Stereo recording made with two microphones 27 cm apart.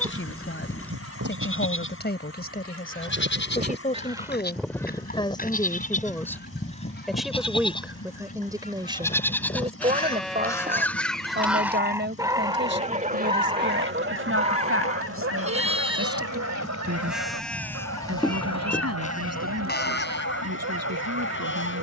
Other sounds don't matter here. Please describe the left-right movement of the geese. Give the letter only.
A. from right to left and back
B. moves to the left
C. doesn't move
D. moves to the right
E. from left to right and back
A.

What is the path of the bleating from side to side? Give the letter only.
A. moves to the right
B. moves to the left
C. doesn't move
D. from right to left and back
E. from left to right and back
E.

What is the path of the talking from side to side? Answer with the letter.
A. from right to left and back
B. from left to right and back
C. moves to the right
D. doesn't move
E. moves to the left
C.